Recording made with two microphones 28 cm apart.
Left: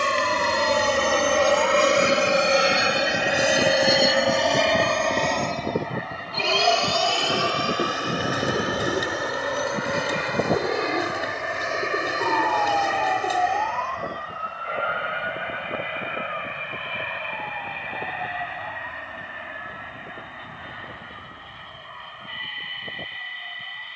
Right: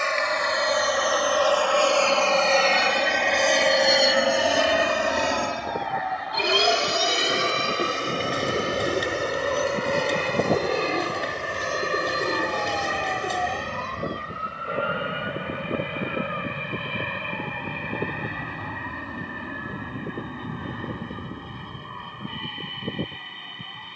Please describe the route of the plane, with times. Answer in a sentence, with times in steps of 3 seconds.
In this clip you hear the plane on the left from 0 s, in the centre from 3 s and on the right from 6 s.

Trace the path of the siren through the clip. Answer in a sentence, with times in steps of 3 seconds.
You can hear the siren on the left from 0 s, in the centre from 9 s and on the right from 12 s.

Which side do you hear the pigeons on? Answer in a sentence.
In this clip you hear the pigeons in the centre.